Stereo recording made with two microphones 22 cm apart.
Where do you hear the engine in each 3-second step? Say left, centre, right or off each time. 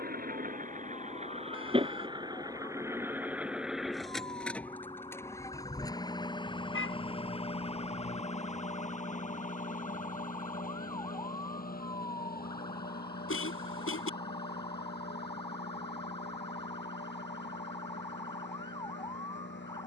right, centre, left, left, left, left, left.